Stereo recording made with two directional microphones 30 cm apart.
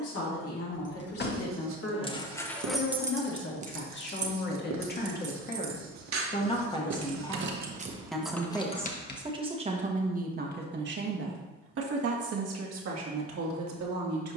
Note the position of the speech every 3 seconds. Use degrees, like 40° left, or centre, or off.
50° left, 30° left, 10° left, 30° right, 60° right.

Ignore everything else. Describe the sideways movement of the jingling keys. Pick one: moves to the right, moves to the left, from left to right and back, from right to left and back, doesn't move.
from left to right and back.